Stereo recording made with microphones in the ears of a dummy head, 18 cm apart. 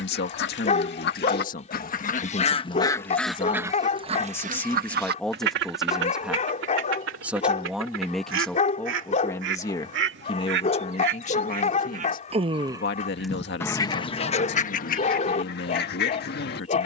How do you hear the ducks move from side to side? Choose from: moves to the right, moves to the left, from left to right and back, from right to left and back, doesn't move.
from left to right and back.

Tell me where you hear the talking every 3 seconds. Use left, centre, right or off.
left, centre, centre, left, left, left.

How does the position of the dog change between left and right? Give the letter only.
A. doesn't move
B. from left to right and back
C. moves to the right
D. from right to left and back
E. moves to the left
A.